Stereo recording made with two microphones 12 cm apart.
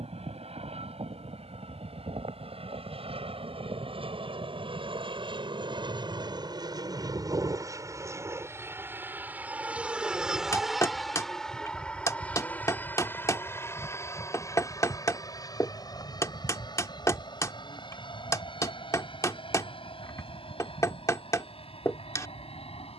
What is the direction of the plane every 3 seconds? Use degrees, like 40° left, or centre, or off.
60° right, 50° right, 30° right, centre, 20° left, 30° left, 40° left, 50° left.